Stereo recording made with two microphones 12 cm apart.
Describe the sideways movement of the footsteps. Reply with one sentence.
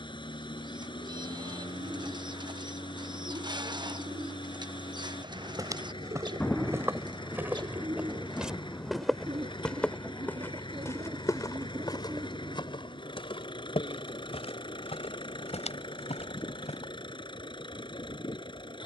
You can hear the footsteps go from the right side to the left.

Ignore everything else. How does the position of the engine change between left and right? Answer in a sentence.
In this clip you hear the engine stay in one place.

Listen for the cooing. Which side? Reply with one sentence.
In this clip you hear the cooing on the right.